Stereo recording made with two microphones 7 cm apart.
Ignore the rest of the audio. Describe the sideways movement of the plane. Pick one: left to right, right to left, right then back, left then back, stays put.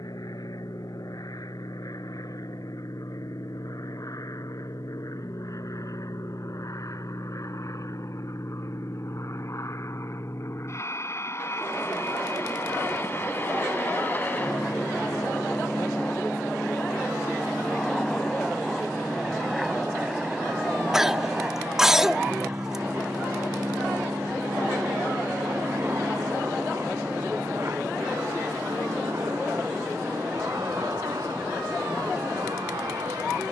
left to right.